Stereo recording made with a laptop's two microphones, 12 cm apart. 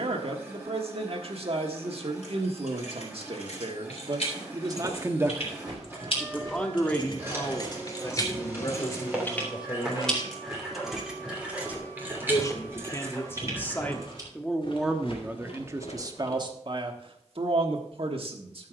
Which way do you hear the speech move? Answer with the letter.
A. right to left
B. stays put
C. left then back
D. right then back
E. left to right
C.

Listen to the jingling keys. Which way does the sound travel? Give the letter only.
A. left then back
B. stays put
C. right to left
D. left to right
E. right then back
D.